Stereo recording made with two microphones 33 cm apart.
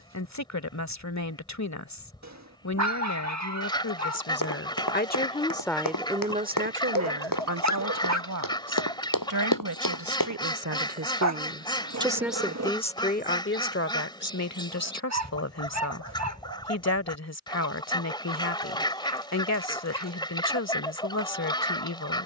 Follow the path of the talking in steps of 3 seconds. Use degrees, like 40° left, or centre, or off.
50° left, 40° left, 40° right, 50° right, 30° left, 50° left, 50° left, 50° left.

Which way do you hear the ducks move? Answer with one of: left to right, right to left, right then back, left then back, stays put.
stays put.